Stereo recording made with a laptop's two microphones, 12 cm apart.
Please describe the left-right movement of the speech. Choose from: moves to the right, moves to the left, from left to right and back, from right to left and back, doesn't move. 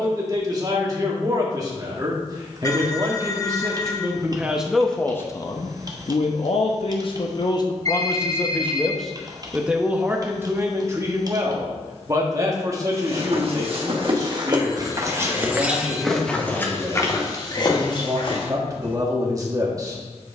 from right to left and back.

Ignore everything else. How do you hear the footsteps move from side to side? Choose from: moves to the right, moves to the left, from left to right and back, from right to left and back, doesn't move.
moves to the left.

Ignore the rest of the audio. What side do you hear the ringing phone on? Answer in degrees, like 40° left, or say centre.
30° left.